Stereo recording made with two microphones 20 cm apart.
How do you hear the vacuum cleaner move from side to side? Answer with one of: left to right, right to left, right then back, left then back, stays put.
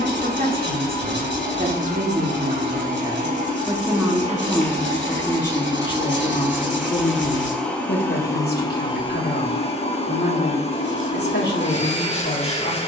right to left.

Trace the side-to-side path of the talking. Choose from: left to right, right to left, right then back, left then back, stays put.
right to left.